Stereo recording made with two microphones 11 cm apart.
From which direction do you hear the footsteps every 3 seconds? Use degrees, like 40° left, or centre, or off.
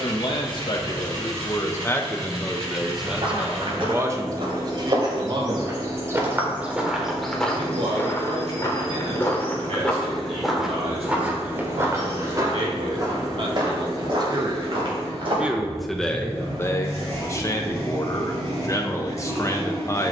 off, 50° right, 10° left, centre, 40° right, 50° right, off.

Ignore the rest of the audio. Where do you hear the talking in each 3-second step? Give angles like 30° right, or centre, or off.
30° left, 30° right, 60° right, 70° right, 50° right, 20° left, 30° left.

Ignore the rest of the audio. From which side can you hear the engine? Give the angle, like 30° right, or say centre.
70° right.